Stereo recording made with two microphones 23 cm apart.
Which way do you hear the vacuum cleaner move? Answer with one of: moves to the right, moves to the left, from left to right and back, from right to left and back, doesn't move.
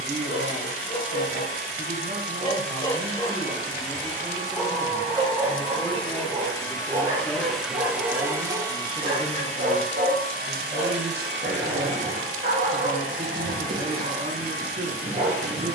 moves to the right.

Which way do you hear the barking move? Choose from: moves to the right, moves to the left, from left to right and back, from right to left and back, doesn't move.
moves to the right.